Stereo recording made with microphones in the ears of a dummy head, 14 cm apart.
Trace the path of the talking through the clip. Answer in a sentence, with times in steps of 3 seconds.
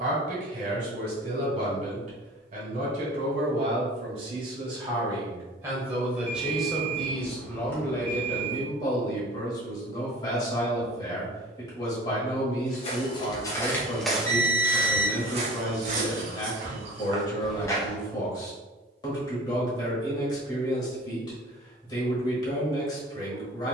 In this clip you hear the talking on the right from 0 s, in the centre from 6 s and on the left from 9 s.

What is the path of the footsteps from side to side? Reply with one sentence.
In this clip you hear the footsteps go right and come back.